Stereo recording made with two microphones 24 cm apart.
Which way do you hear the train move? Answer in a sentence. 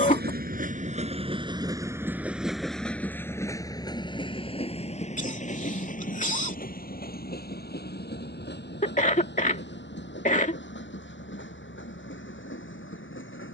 You can hear the train move to the left.